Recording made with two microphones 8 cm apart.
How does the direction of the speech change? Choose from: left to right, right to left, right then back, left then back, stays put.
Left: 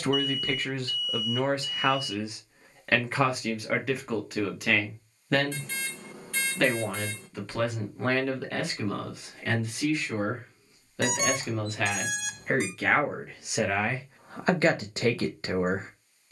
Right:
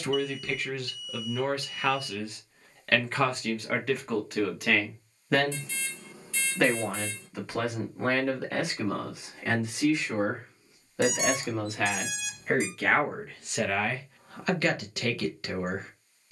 right then back.